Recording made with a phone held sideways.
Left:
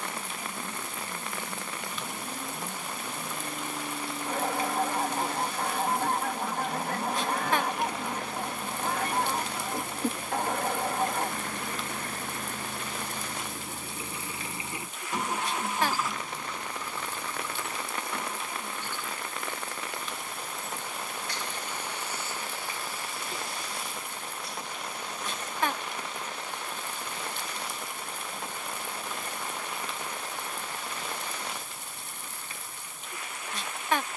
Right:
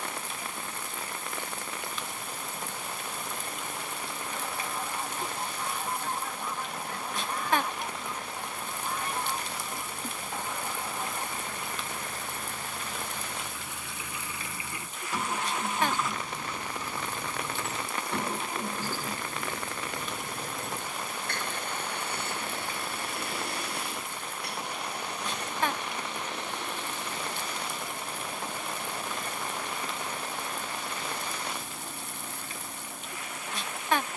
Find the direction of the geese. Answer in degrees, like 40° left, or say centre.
70° left.